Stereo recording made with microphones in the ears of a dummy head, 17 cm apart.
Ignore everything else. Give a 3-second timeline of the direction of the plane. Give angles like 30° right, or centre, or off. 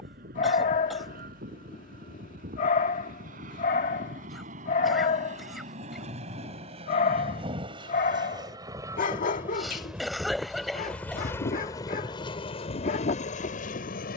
50° right, 50° right, 30° right, centre, 40° left.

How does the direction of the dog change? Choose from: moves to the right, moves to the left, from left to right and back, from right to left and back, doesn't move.
doesn't move.